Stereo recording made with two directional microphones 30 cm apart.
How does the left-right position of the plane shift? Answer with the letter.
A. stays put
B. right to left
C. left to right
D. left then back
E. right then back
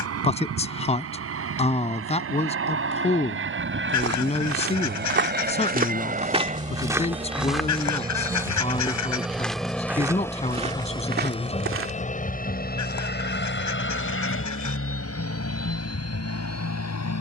B.